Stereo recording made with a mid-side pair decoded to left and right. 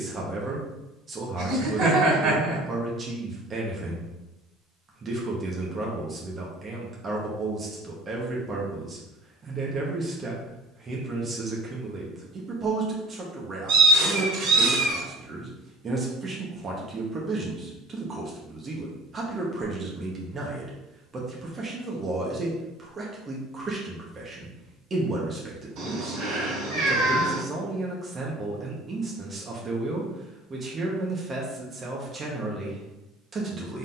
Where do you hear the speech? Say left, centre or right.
right.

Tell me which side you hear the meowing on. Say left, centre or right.
right.